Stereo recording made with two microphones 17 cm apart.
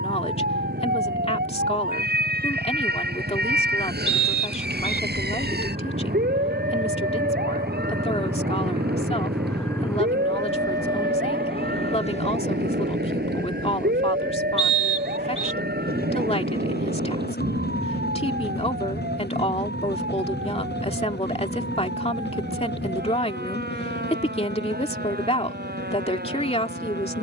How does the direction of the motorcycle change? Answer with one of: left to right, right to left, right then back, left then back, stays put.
right to left.